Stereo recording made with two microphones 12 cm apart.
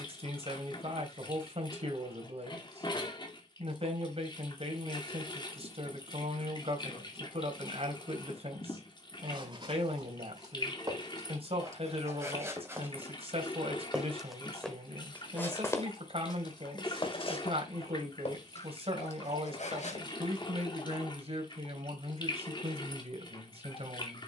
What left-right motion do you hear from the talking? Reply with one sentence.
In this clip you hear the talking stay in one place.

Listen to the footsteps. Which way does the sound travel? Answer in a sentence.
You can hear the footsteps go from the right side to the left.